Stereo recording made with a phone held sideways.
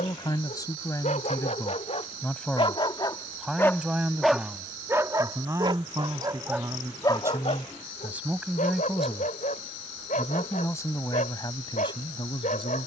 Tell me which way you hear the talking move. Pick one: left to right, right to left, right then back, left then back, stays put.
right then back.